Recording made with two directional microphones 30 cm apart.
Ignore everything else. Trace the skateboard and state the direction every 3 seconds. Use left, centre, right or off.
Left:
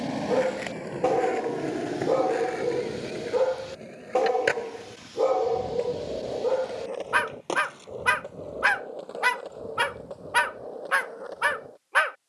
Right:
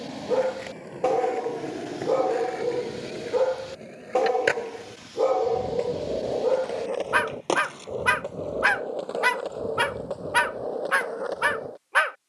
left, centre, right, right.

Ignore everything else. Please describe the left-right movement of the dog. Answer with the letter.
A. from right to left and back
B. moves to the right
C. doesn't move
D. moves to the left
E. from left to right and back
C.